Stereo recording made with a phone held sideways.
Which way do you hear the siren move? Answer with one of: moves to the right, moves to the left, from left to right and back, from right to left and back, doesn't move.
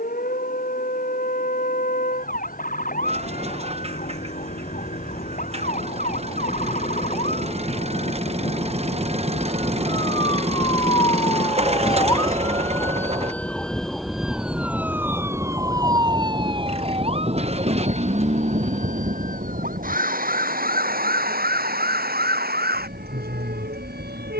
moves to the right.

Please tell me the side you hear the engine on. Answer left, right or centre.
right.